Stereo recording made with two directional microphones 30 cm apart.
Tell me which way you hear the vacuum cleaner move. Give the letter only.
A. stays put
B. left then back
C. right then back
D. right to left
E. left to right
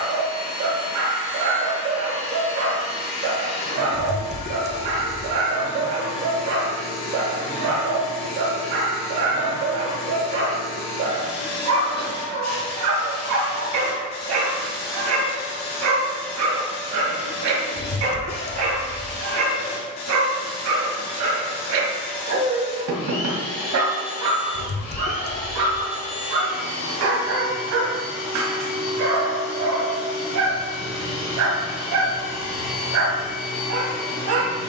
A.